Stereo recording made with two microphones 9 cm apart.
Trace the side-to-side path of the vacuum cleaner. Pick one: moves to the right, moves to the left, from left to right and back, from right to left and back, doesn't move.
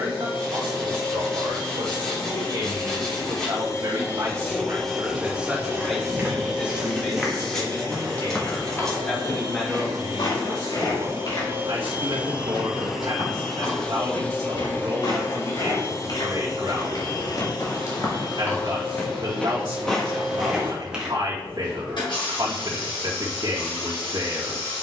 from left to right and back.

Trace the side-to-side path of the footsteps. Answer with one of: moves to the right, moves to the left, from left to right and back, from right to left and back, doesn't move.
from right to left and back.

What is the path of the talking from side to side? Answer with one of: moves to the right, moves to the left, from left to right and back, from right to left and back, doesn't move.
from right to left and back.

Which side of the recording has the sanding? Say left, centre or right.
centre.